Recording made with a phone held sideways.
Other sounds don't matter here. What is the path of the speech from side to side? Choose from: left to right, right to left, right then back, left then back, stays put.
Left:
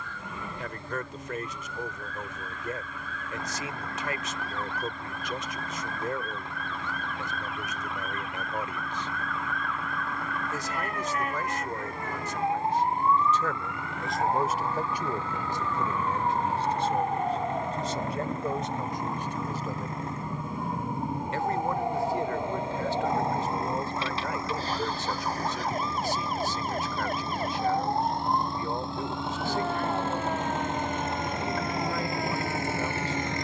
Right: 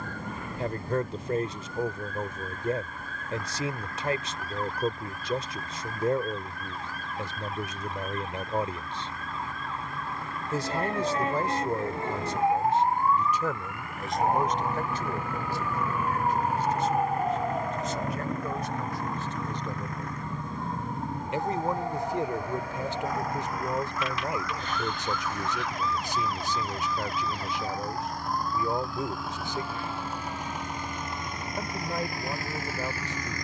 left then back.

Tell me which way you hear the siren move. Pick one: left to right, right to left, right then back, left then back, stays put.
right to left.